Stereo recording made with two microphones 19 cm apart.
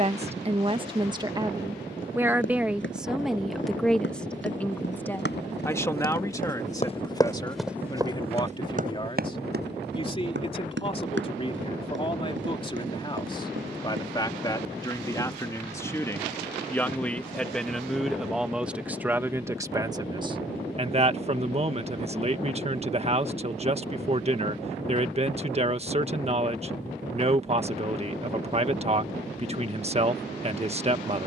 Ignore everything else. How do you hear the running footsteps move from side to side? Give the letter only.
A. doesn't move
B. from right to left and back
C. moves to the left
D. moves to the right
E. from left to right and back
D.